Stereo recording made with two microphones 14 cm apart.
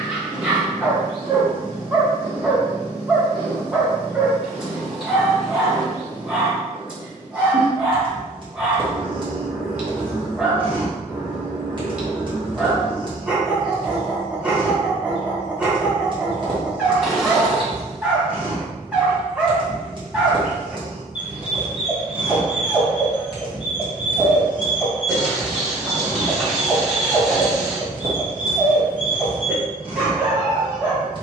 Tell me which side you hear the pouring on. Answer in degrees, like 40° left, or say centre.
centre.